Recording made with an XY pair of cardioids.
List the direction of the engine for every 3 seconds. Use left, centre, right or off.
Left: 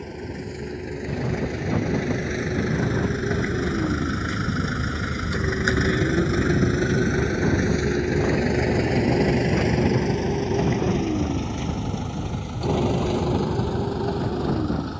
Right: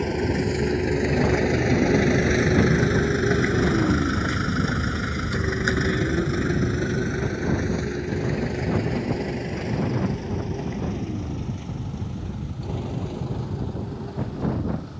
right, centre, left, left, left.